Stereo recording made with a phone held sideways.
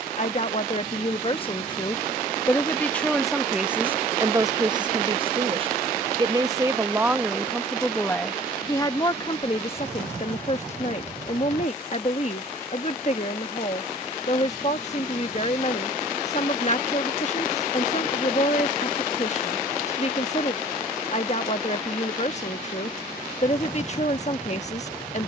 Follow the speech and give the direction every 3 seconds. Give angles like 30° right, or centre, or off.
30° left, 20° right, centre, 40° left, 40° left, 40° left, 40° left, 40° left, 40° left.